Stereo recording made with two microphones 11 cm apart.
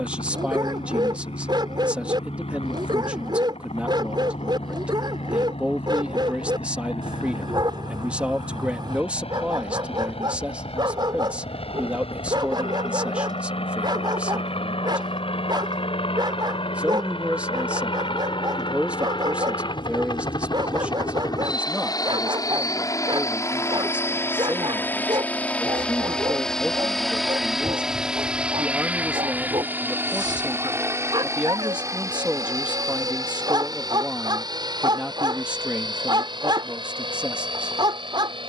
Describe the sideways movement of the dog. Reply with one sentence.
You can hear the dog stay put.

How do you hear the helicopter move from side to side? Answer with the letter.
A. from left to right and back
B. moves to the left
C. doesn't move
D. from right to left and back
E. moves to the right
E.